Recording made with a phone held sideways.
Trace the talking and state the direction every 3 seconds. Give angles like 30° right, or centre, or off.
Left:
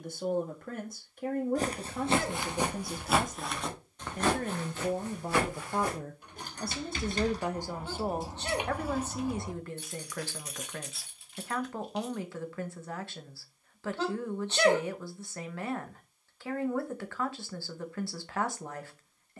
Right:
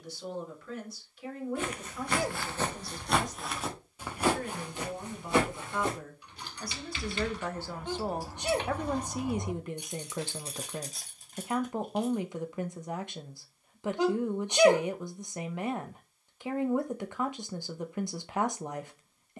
50° left, 50° left, 10° left, 20° right, 20° right, 20° right, 20° right.